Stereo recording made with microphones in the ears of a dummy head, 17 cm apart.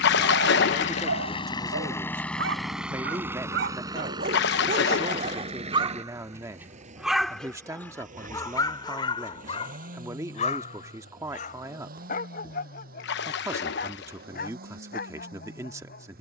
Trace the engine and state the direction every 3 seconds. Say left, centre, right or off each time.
left, right, right, right, right, right.